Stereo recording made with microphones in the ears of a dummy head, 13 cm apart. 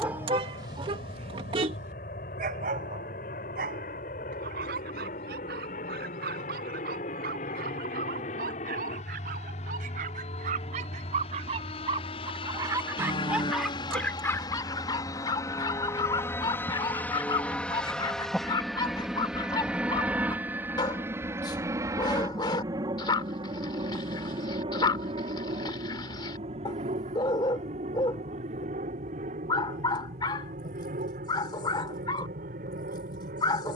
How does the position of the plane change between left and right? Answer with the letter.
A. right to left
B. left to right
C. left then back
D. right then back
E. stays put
B.